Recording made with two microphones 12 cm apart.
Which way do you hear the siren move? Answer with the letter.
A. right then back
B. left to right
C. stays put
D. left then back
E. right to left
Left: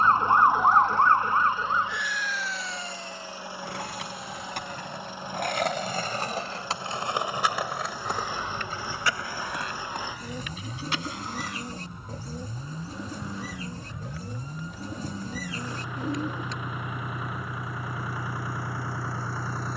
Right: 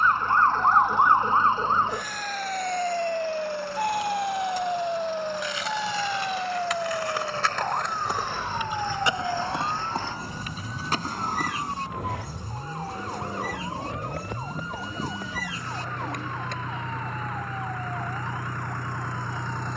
B.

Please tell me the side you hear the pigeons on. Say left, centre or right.
left.